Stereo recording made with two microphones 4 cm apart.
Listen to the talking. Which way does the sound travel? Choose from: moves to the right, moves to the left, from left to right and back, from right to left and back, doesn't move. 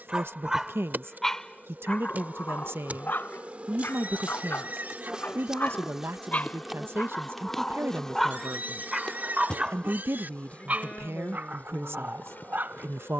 doesn't move.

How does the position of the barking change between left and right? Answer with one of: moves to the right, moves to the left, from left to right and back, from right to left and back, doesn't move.
from right to left and back.